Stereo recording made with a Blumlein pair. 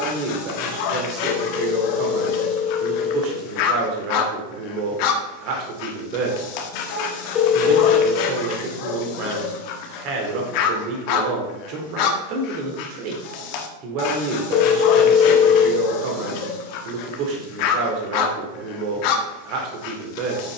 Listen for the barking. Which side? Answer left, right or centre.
left.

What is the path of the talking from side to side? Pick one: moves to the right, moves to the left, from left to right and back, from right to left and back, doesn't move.
doesn't move.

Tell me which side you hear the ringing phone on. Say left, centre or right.
left.